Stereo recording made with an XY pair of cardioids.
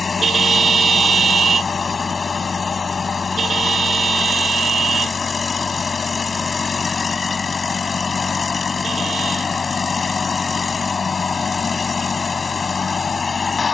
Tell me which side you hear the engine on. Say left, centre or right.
left.